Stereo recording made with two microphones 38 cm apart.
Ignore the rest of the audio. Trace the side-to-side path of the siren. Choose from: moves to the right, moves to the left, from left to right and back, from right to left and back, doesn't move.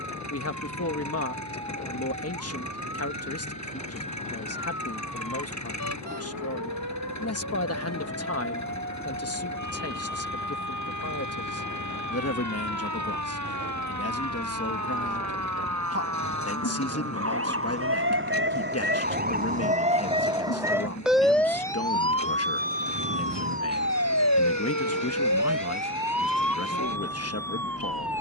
moves to the left.